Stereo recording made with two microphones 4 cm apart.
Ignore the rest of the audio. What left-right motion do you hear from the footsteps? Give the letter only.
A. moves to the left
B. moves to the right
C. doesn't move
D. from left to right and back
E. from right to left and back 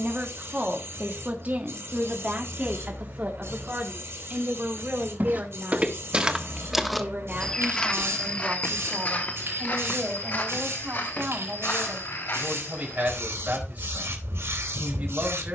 A.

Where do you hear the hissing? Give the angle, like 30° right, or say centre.
80° right.